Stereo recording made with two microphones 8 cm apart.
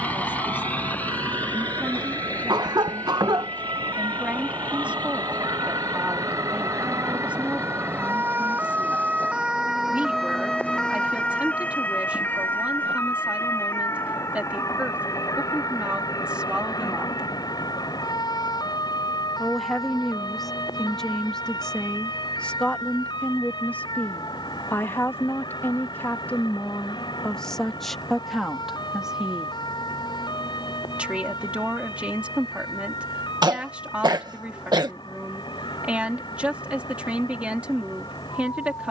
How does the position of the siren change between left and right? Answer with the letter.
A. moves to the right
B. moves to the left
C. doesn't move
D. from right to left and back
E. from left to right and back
B.